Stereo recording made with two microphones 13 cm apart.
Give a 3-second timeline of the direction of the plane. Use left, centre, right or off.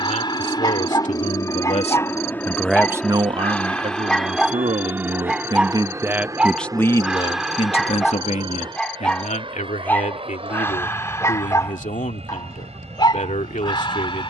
left, centre, right, right, right.